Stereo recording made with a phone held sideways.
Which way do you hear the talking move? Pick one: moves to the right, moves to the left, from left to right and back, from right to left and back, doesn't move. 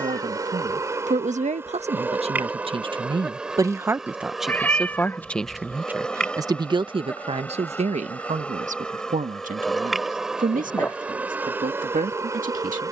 from right to left and back.